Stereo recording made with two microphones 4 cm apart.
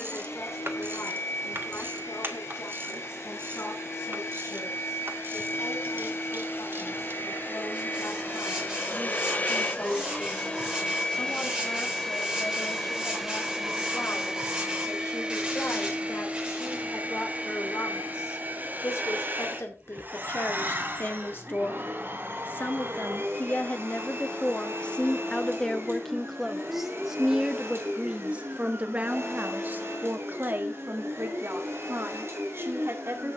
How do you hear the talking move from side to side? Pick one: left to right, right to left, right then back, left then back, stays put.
left to right.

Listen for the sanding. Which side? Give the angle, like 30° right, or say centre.
20° right.